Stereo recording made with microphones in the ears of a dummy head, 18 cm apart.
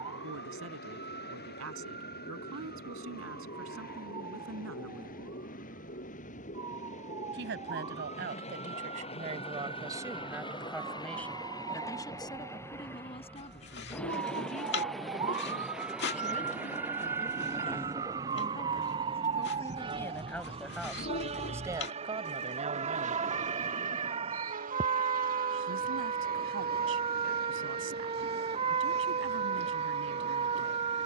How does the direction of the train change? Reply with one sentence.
You can hear the train move to the right.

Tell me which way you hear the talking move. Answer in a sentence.
You can hear the talking go left and come back.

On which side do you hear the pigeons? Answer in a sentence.
You can hear the pigeons on the left.